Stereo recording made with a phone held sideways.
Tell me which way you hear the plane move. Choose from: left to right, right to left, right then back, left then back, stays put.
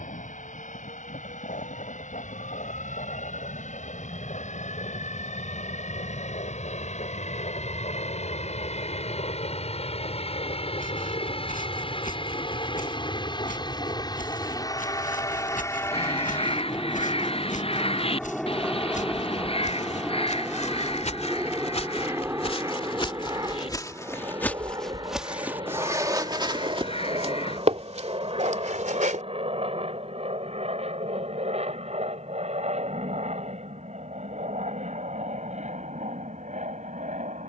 left to right.